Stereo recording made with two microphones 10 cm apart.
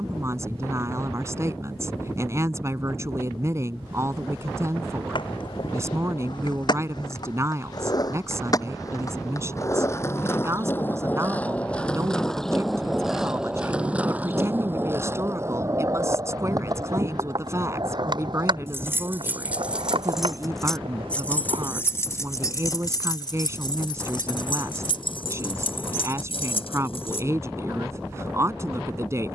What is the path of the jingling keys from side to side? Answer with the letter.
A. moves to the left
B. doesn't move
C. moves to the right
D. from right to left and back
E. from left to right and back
A.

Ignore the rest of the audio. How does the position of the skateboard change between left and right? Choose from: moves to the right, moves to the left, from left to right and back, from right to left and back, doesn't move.
moves to the right.